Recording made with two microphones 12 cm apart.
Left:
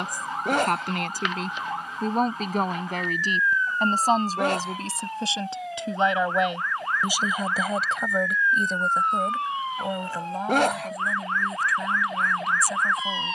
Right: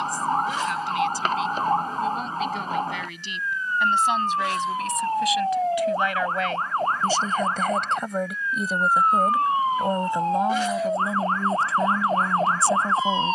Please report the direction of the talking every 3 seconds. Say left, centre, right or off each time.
left, left, centre, right, right.